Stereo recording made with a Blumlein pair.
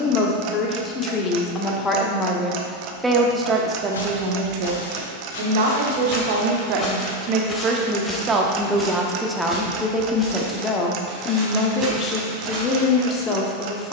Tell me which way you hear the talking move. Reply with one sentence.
In this clip you hear the talking move from left to right and back again.